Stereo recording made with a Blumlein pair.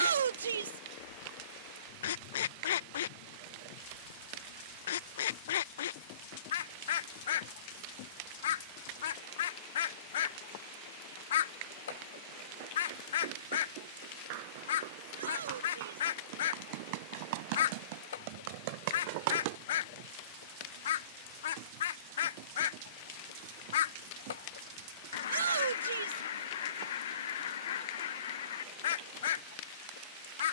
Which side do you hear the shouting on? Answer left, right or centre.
right.